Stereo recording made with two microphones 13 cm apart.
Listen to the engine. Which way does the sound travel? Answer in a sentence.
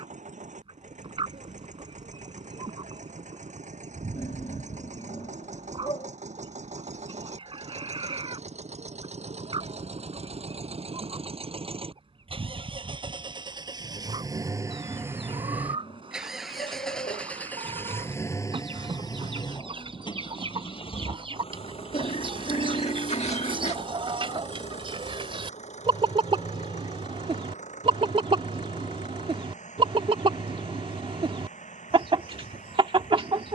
In this clip you hear the engine move from right to left.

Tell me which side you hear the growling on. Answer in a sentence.
You can hear the growling on the left.